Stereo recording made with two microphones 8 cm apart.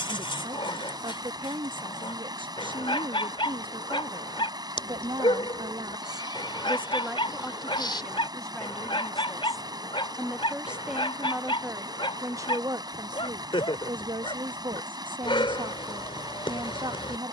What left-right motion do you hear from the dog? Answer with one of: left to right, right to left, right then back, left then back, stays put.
stays put.